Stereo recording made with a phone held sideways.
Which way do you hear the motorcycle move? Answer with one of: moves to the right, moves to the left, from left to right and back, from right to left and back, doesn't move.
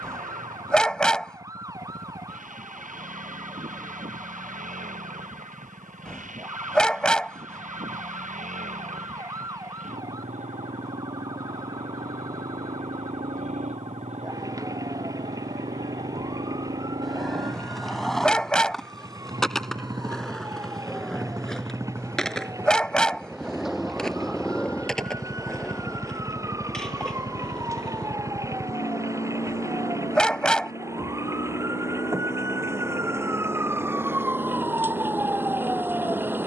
moves to the left.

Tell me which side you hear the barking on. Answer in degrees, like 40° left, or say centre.
10° left.